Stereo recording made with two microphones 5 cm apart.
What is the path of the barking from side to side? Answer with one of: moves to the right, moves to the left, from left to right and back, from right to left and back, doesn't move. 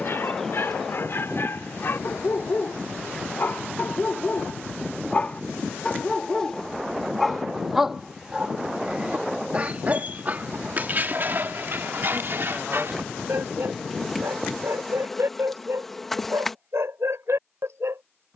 moves to the right.